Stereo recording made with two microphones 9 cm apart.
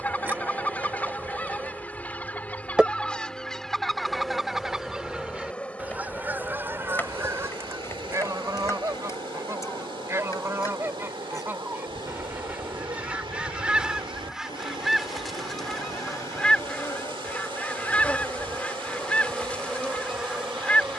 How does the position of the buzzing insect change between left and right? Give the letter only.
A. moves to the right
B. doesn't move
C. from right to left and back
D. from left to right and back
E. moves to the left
C.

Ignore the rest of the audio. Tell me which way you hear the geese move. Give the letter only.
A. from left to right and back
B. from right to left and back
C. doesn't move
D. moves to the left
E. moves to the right
A.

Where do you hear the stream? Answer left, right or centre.
right.